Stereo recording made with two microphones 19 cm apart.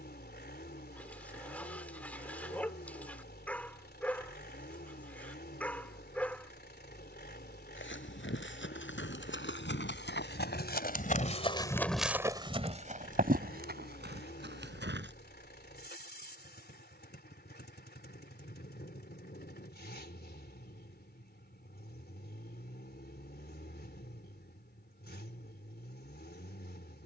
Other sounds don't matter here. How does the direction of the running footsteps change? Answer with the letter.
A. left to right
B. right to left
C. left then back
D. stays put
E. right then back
A.